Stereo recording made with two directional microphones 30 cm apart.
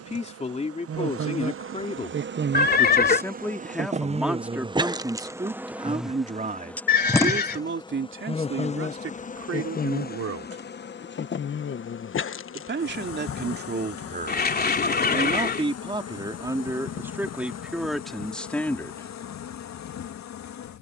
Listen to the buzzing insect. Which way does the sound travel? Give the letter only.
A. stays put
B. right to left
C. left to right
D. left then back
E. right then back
B.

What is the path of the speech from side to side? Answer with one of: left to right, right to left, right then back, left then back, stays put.
right then back.